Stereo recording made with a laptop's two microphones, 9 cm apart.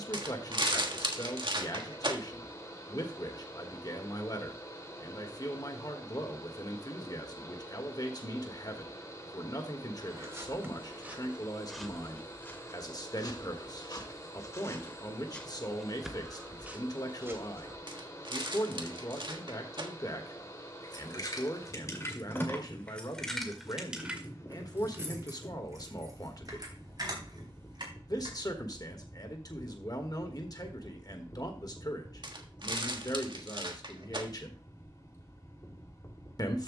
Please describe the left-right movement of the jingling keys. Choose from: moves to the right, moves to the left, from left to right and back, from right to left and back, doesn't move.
moves to the right.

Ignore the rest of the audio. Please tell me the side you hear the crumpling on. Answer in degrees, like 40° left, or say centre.
50° right.